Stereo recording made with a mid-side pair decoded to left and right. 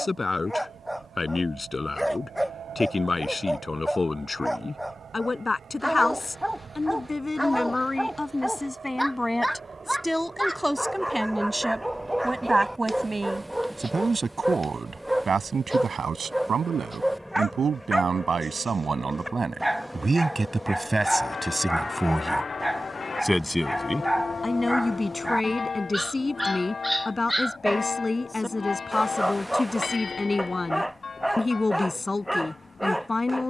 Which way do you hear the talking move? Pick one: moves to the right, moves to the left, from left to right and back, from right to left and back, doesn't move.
from left to right and back.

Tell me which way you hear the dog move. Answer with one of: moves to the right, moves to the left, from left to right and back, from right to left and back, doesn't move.
doesn't move.